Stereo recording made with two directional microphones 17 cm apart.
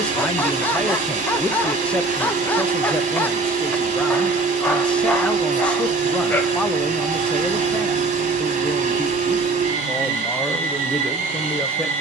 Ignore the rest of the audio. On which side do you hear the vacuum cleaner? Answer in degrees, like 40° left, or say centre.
50° right.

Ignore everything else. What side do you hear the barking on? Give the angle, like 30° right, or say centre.
10° left.